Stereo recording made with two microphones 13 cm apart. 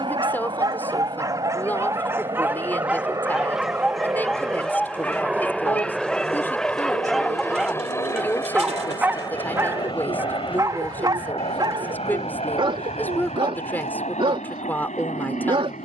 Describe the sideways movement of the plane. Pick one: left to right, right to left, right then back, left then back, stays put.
right to left.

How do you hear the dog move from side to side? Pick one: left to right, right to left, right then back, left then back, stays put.
left then back.